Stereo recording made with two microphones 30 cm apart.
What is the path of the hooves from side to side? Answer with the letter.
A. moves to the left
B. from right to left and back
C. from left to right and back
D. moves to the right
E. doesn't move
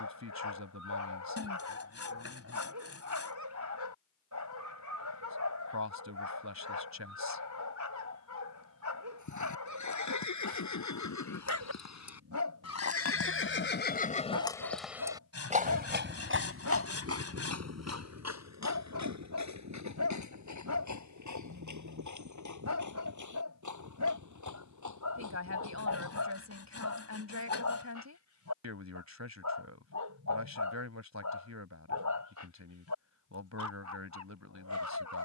D.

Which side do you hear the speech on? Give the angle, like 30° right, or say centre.
70° right.